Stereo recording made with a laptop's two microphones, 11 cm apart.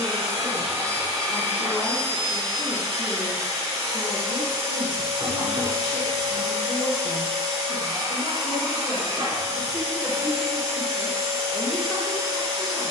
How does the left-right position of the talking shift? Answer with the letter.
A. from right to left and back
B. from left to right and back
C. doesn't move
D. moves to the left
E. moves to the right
B.